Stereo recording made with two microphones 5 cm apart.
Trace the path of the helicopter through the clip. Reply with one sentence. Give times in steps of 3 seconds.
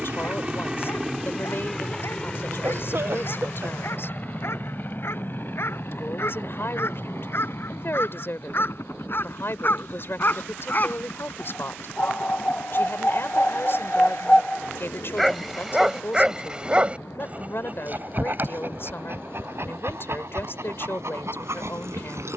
You can hear the helicopter in the centre from 0 s, on the left from 3 s and not at all from 21 s.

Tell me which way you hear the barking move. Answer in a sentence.
You can hear the barking move to the right.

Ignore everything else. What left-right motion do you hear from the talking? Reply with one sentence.
You can hear the talking stay put.